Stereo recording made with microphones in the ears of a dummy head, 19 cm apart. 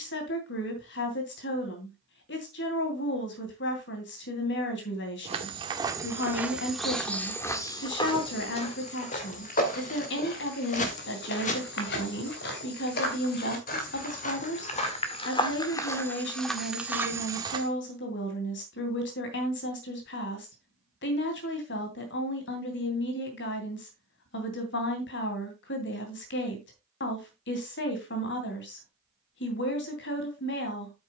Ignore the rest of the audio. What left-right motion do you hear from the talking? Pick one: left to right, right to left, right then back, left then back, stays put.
stays put.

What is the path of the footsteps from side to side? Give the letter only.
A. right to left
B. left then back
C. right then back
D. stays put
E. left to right
B.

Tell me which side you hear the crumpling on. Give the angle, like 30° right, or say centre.
40° left.